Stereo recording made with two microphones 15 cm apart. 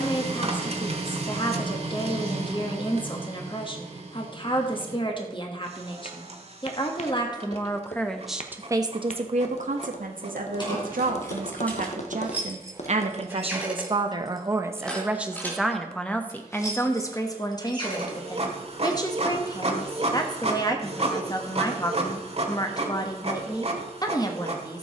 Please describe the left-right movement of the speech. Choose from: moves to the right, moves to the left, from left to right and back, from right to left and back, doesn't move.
from left to right and back.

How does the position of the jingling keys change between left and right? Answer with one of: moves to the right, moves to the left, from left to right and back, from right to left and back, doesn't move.
from left to right and back.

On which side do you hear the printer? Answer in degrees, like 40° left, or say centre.
40° right.